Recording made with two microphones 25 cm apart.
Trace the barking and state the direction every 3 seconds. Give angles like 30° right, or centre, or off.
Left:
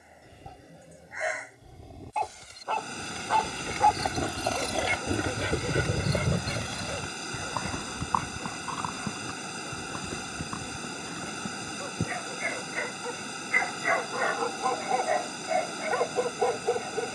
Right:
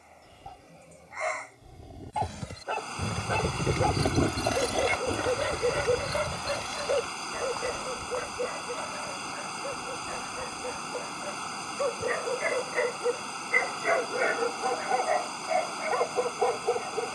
10° left, 50° right, 70° right, 80° right, 40° right, centre.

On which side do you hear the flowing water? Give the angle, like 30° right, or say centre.
20° left.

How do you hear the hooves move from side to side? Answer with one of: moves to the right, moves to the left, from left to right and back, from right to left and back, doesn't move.
moves to the left.